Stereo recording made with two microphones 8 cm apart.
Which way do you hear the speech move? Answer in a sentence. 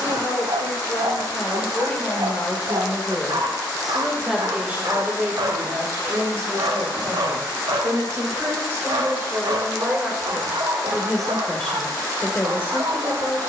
You can hear the speech move from left to right and back again.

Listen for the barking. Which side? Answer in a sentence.
You can hear the barking on the right.